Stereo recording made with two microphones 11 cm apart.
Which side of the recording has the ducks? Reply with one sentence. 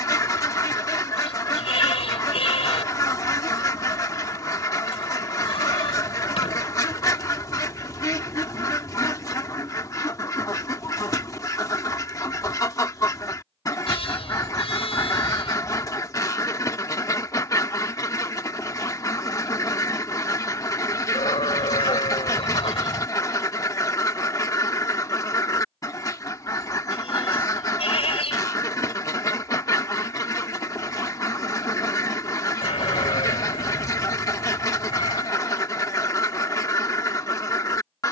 In this clip you hear the ducks on the left.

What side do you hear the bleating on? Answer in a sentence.
You can hear the bleating on the left.